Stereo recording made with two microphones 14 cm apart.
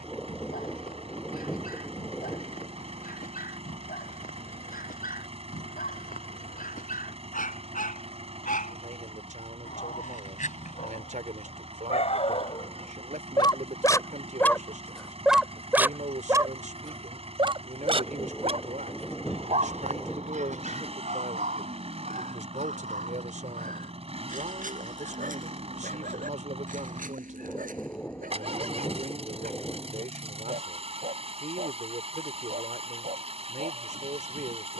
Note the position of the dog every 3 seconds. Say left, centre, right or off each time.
left, left, left, left, left, right, right, right, right, right, right, right.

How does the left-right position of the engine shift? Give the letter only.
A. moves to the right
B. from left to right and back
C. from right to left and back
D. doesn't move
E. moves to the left
D.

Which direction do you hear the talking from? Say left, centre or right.
right.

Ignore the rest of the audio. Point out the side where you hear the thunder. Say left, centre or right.
centre.